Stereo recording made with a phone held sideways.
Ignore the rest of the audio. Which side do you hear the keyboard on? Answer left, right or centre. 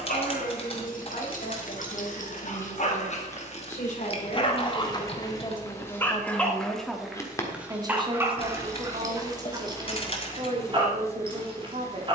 left.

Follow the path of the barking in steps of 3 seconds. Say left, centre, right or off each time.
left, left, centre, right.